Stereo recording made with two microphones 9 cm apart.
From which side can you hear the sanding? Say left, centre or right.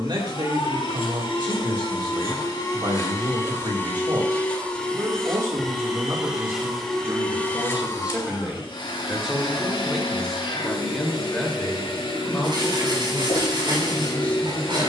right.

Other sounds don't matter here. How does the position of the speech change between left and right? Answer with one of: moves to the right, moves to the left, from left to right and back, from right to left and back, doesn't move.
moves to the left.